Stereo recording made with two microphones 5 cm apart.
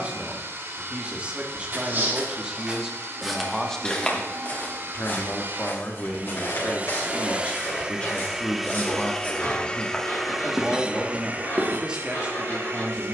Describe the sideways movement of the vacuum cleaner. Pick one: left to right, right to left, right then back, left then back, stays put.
left then back.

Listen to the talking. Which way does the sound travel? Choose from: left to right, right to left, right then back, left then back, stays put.
left then back.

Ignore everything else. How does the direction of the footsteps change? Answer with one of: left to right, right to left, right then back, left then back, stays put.
left then back.